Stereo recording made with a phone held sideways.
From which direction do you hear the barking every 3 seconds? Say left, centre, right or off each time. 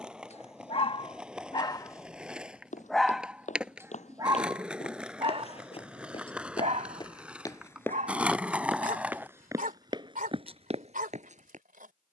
left, right, right, right.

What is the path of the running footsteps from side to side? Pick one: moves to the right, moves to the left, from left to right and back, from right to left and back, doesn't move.
moves to the right.